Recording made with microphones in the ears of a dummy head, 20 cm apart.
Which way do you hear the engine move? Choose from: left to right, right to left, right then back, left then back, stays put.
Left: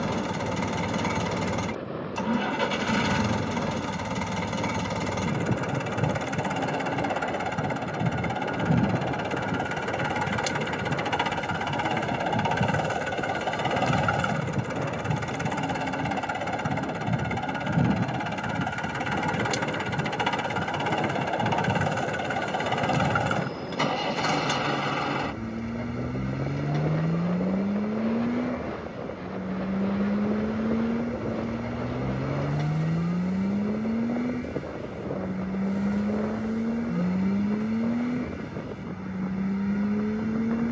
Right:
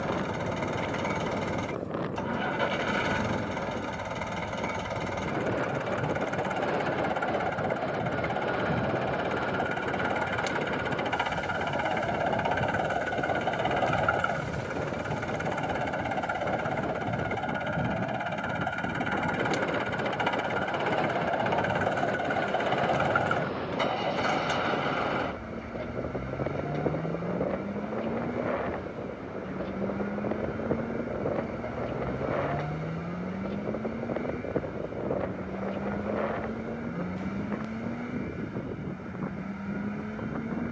stays put.